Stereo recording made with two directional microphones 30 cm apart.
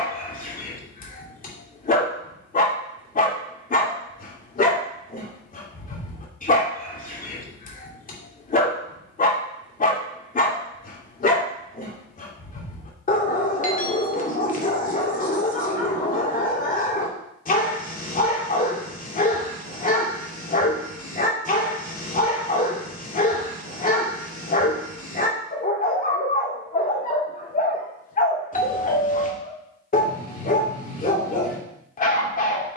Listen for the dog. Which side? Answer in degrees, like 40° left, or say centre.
30° left.